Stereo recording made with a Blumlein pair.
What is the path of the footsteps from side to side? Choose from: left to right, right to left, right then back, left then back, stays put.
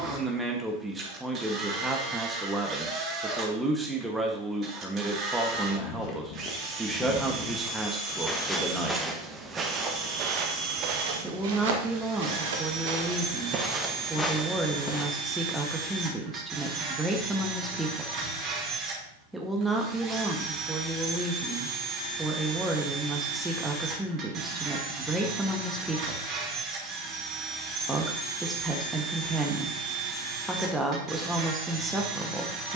right then back.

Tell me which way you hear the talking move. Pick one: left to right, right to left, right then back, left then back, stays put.
stays put.